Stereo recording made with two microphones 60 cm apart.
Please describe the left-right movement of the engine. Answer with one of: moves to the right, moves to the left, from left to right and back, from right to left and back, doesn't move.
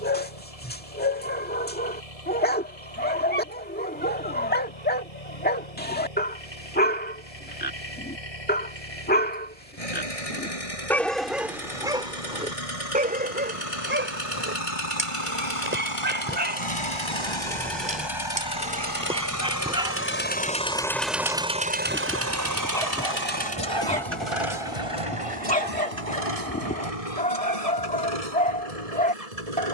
moves to the right.